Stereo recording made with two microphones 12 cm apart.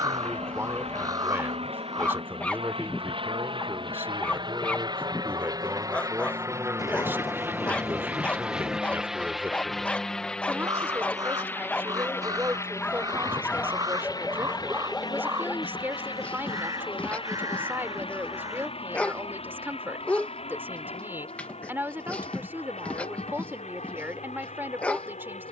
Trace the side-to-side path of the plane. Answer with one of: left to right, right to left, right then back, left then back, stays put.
right to left.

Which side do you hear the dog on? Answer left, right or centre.
centre.